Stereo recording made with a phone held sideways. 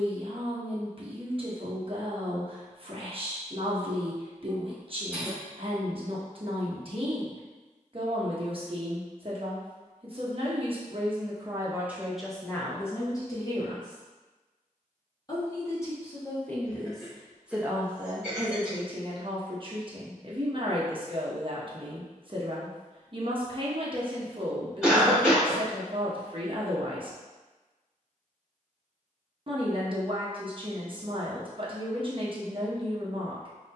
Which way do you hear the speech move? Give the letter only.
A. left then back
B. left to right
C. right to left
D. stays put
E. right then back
A.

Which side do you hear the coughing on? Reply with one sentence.
You can hear the coughing in the centre.